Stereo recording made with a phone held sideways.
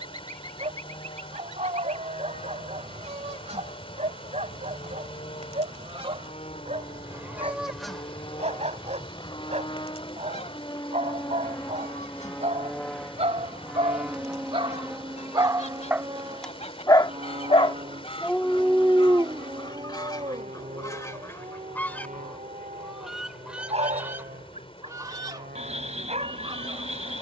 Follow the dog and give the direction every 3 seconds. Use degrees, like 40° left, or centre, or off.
50° right, 50° right, 50° right, 50° right, 50° right, centre, 20° right, 50° right, 50° right.